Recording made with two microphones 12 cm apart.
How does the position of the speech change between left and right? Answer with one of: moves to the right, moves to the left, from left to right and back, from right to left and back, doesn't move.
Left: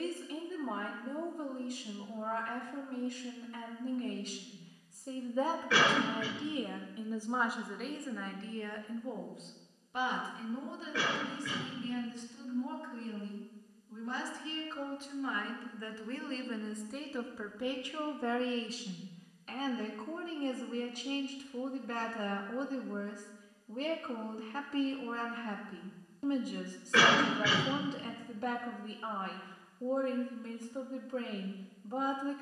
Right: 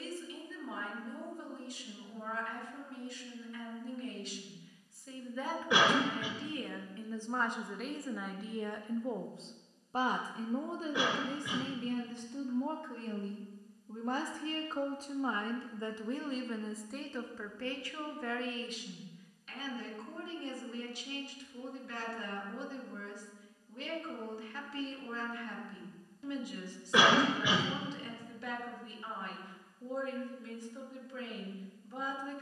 from left to right and back.